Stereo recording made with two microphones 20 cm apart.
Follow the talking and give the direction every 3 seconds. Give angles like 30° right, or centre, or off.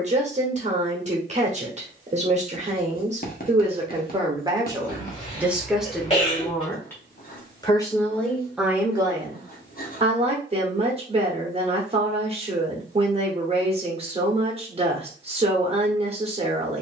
40° right, 20° right, centre, 30° right, 30° right, 30° right.